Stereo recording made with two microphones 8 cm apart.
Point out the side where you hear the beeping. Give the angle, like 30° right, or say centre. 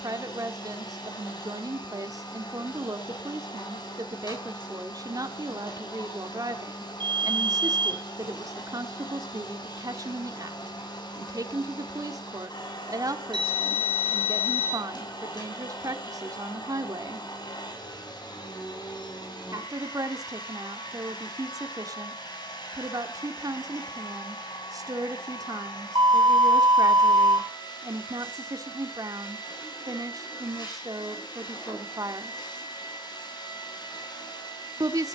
80° right.